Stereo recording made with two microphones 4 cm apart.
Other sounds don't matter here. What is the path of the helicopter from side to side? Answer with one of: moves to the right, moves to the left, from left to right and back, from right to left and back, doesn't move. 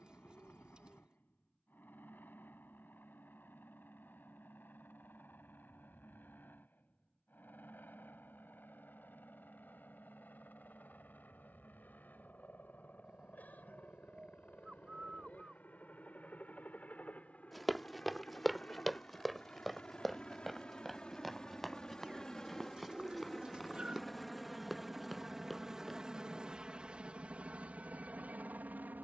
moves to the right.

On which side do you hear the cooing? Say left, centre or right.
right.